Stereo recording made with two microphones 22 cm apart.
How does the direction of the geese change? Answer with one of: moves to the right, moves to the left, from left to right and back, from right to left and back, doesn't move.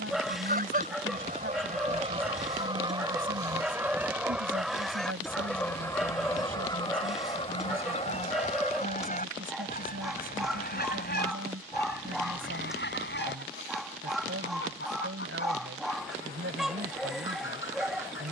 moves to the left.